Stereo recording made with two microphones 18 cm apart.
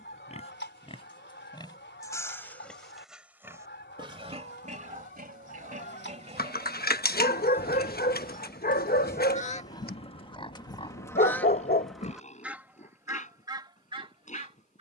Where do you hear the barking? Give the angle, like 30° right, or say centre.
60° left.